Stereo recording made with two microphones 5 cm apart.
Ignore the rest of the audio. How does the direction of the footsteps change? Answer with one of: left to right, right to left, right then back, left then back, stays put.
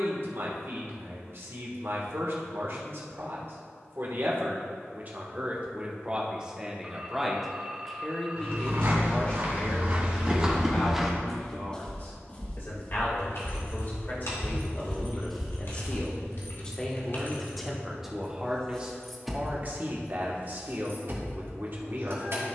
left then back.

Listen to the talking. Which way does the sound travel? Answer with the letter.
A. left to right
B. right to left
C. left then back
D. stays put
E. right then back
C.